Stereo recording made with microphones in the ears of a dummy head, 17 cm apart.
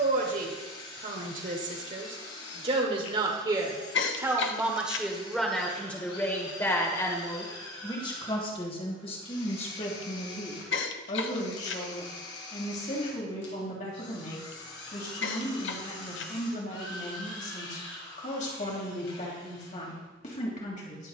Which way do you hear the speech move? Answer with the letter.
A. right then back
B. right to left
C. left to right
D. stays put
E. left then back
B.